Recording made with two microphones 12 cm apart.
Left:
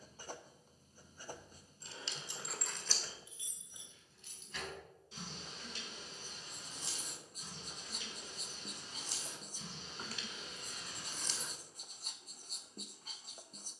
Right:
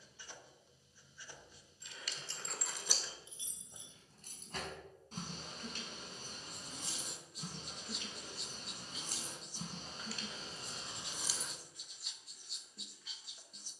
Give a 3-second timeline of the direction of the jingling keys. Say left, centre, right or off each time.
centre, right, right, right, off.